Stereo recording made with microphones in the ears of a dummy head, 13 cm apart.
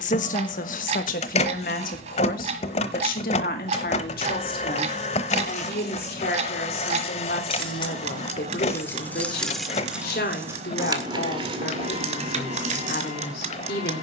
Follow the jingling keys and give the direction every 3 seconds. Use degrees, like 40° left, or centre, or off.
off, 50° left, 40° left, 20° right, 50° right.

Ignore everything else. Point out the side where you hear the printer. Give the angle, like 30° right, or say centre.
50° left.